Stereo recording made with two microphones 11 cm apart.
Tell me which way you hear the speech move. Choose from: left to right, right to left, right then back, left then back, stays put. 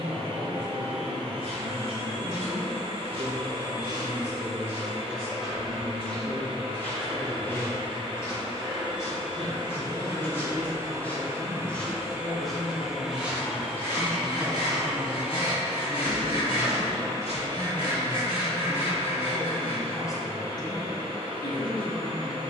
right to left.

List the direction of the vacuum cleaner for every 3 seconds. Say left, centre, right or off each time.
right, right, right, right, centre, right, right, right.